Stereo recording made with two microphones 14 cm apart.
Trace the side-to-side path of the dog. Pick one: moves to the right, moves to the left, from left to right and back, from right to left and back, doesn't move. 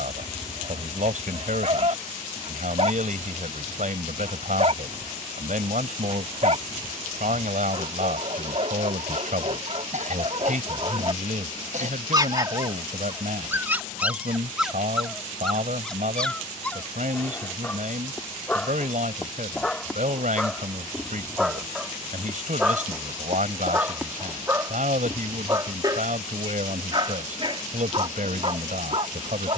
from right to left and back.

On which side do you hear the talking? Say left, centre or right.
right.